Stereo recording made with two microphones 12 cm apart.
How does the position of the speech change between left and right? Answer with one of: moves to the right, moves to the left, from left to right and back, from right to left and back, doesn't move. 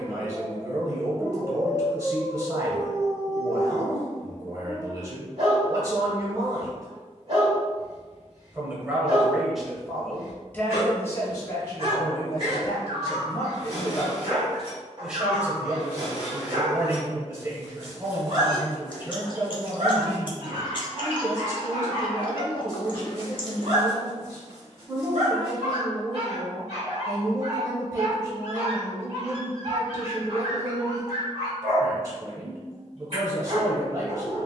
from right to left and back.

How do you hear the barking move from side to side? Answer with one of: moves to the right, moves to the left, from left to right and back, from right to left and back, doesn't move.
doesn't move.